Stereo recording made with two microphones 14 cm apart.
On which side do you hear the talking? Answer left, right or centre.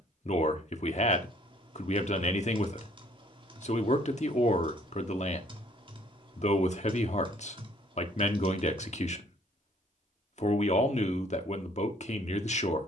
left.